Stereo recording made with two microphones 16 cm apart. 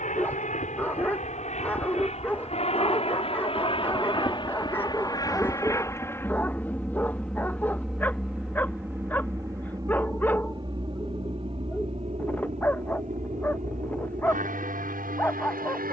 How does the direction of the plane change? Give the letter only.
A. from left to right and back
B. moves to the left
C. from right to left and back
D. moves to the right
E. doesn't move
D.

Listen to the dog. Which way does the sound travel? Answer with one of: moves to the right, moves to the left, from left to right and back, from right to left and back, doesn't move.
doesn't move.